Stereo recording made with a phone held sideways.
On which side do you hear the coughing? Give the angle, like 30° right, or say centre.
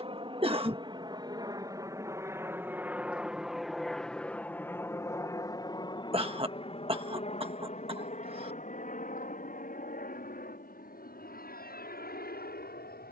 40° right.